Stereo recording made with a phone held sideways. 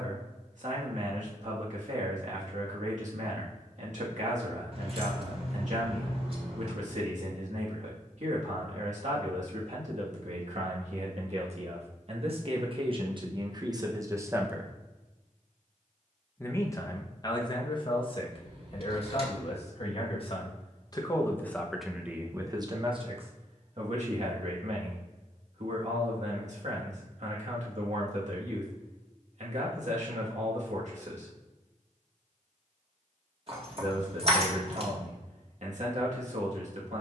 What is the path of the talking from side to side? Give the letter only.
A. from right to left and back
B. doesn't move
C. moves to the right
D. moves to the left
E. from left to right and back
A.